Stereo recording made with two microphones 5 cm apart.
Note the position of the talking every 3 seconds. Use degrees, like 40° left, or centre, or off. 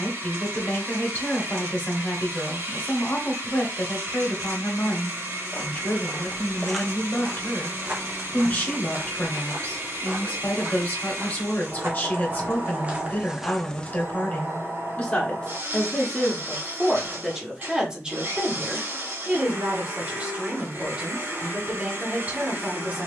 30° left, 30° left, 30° left, 30° left, 30° left, centre, 30° right, 30° right.